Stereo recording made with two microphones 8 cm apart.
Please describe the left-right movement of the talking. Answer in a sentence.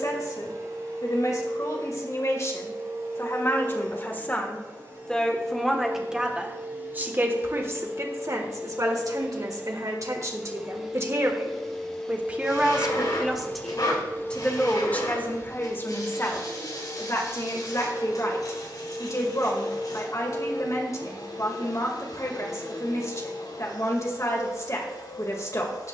You can hear the talking move from left to right and back again.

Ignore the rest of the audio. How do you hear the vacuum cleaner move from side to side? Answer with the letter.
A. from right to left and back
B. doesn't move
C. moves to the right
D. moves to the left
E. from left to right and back
D.